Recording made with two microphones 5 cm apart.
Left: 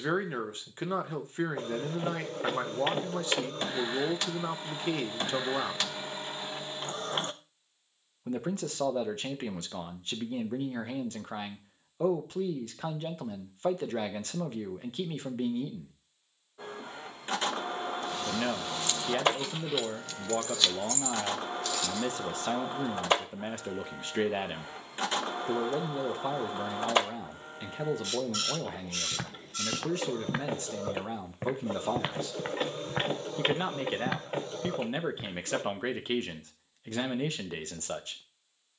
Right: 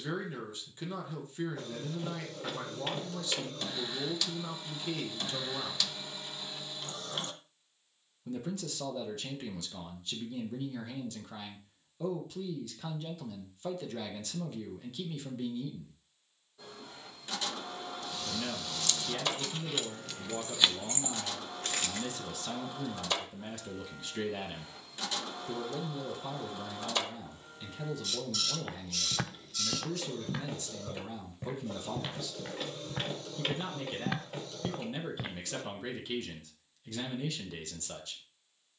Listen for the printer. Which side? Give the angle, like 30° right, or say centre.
40° left.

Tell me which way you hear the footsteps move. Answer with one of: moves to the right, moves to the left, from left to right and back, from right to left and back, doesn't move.
from right to left and back.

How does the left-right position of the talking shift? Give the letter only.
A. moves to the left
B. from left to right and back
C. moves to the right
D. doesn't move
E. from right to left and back
D.